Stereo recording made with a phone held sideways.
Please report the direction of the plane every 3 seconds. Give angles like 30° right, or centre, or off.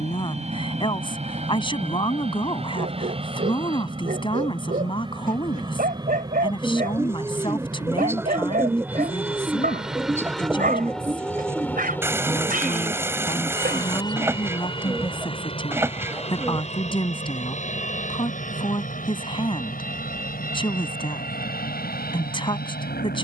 40° right, 30° right, 20° right, centre, 20° left, 40° left, 50° left, 60° left.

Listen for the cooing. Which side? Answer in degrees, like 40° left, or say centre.
10° right.